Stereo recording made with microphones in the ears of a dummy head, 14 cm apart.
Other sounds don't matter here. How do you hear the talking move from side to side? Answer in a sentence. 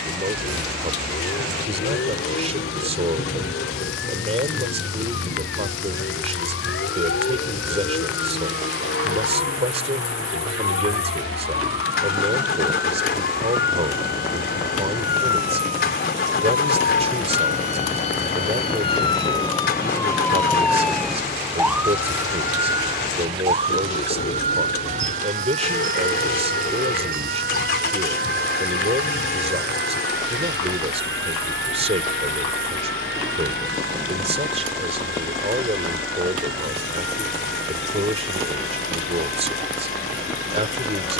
You can hear the talking stay put.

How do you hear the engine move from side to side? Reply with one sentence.
In this clip you hear the engine stay put.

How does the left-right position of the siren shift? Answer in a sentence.
In this clip you hear the siren go from the left side to the right.